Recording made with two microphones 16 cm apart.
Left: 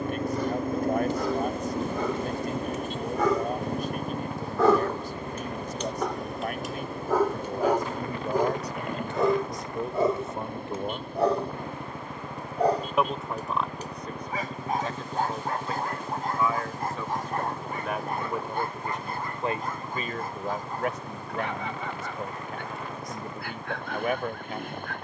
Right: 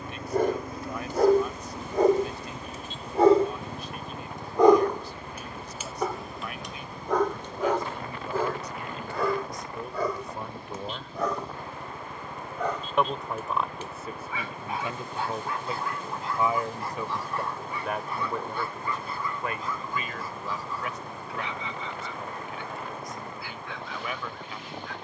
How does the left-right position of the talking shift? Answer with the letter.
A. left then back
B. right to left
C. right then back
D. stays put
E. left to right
C.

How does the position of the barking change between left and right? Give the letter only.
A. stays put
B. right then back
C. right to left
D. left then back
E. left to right
C.